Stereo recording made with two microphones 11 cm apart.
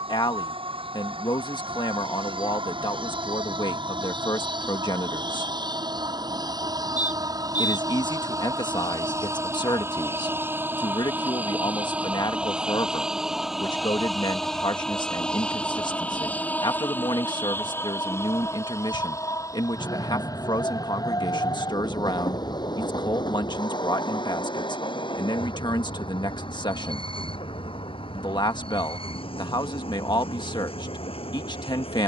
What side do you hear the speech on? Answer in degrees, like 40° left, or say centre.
40° left.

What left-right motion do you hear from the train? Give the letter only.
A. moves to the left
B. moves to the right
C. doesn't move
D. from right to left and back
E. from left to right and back
A.